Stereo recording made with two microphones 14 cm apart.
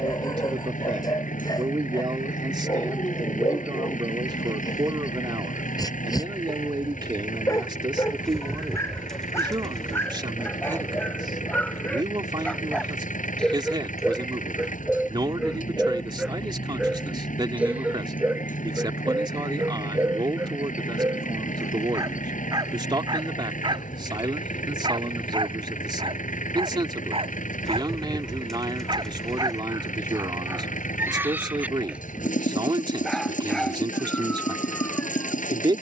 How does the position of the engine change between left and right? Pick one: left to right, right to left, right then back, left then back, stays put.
stays put.